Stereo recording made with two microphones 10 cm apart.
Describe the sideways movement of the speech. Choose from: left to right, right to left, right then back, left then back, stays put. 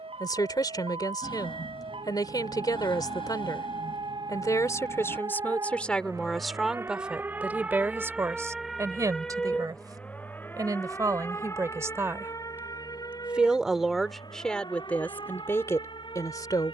right then back.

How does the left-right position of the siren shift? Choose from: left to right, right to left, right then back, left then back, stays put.
right to left.